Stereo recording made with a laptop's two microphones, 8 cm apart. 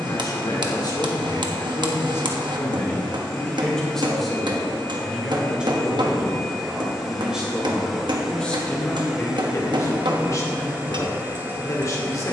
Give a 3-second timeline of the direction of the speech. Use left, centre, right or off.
left, centre, centre, left.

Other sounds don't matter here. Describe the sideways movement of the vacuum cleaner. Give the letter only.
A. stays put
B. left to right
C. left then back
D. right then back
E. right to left
B.